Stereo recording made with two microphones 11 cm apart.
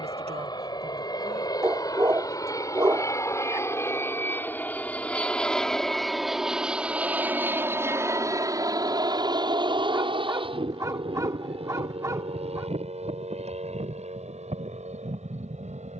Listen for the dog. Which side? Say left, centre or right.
right.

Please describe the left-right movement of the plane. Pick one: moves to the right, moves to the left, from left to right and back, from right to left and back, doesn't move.
moves to the right.